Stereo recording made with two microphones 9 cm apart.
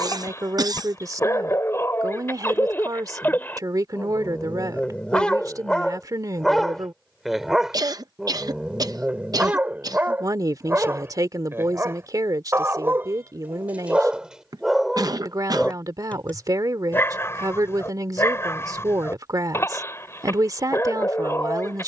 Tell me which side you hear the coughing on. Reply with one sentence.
You can hear the coughing on the right.